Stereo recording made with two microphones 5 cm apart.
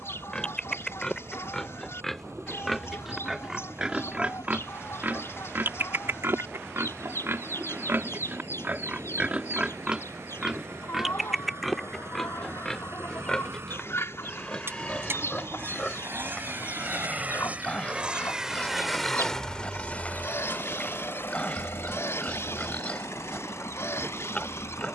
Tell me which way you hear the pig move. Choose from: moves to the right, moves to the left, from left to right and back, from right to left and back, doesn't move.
from left to right and back.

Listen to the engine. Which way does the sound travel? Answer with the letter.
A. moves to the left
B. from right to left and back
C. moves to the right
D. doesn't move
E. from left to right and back
A.